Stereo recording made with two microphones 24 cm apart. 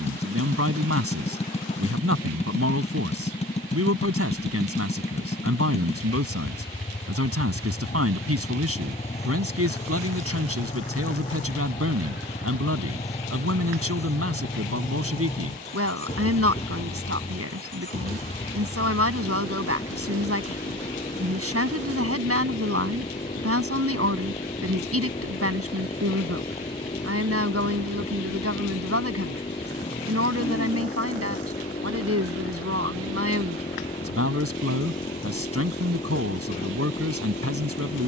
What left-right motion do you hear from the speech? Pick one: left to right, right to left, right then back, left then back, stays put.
stays put.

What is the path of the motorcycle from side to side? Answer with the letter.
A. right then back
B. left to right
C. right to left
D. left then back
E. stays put
E.